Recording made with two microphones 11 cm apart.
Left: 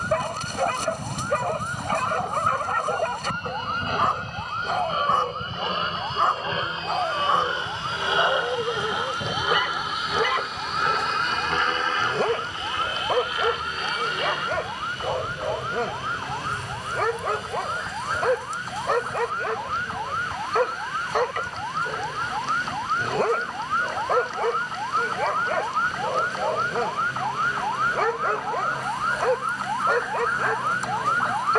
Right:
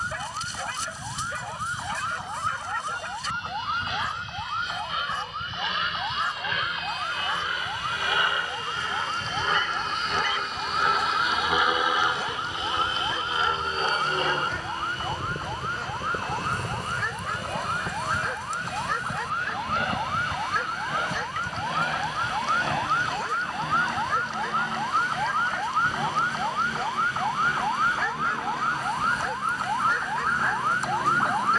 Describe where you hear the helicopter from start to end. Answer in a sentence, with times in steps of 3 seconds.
In this clip you hear the helicopter on the left from 0 s, in the centre from 9 s and on the right from 12 s.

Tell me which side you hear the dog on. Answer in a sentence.
In this clip you hear the dog on the left.